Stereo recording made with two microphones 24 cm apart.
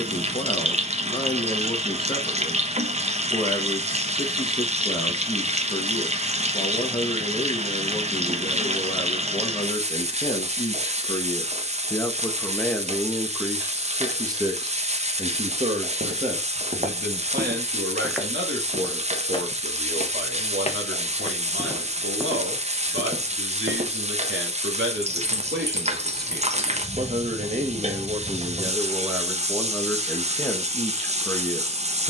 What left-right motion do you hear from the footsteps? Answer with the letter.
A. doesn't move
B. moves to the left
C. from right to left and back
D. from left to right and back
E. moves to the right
C.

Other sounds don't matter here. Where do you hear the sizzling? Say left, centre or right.
right.